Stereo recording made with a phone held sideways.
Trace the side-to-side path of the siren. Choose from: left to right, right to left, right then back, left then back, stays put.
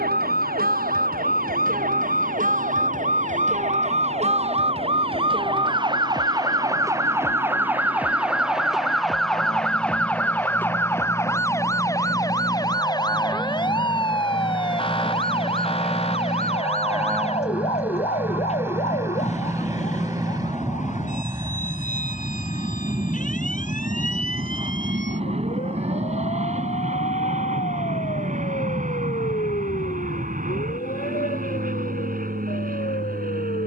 right to left.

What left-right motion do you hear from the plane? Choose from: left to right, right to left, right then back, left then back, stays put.
left to right.